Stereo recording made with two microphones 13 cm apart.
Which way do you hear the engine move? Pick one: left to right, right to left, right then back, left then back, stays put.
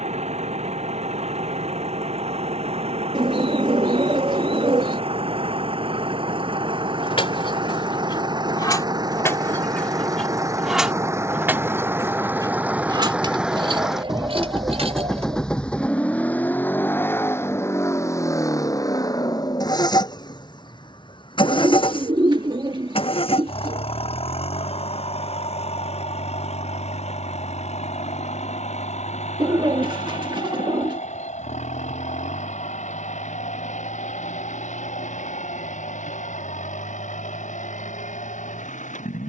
right to left.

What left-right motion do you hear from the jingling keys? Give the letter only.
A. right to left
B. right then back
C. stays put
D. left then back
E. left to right
E.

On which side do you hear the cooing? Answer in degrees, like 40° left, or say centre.
40° right.